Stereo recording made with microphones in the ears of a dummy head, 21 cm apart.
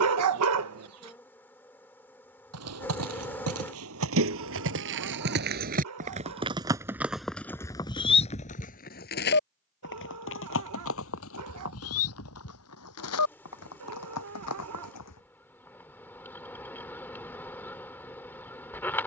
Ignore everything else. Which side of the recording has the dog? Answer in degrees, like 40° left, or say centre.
70° right.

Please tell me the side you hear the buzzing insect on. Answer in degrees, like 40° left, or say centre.
10° left.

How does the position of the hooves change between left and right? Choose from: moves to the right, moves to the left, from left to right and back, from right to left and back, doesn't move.
moves to the left.